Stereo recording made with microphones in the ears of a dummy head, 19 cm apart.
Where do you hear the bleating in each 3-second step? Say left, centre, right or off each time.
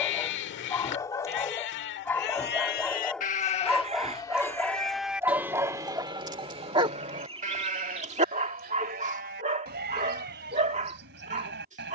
left, centre, right, right.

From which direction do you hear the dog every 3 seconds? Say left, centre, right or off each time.
centre, centre, right, right.